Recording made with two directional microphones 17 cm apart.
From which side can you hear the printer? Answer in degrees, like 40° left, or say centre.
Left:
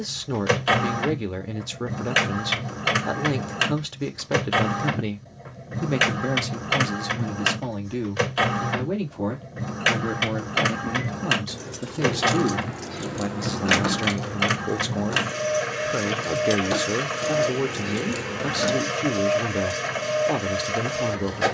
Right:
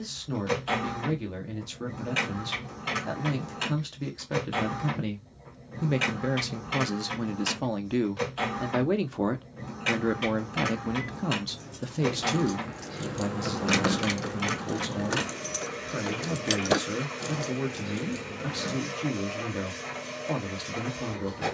60° left.